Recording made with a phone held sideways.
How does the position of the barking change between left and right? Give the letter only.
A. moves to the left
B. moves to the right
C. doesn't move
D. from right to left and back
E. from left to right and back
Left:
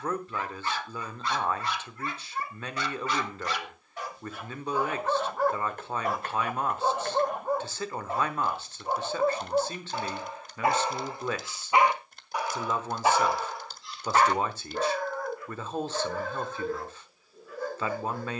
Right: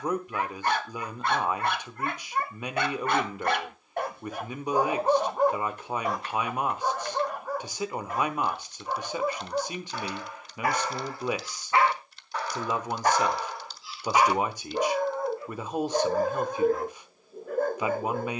D.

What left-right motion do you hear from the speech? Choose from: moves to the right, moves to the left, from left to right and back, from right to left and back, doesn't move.
doesn't move.